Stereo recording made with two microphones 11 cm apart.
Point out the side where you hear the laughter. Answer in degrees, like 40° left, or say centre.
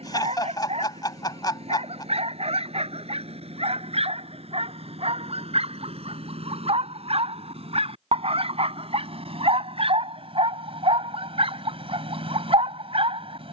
40° left.